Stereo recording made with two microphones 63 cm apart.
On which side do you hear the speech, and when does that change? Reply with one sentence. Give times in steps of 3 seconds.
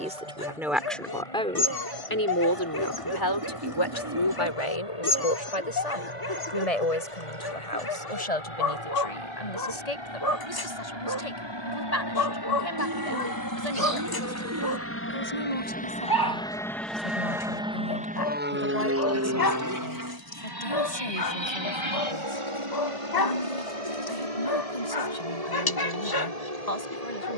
You can hear the speech in the centre from 0 s and on the left from 3 s.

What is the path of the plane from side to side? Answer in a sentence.
You can hear the plane go from the left side to the right.